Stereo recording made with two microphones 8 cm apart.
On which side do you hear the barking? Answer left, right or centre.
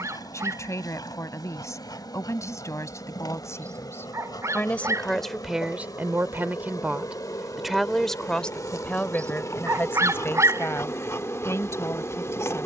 right.